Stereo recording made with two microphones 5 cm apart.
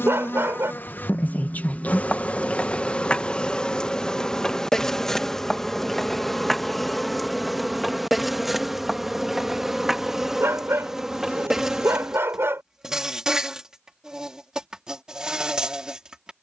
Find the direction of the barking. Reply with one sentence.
You can hear the barking on the right.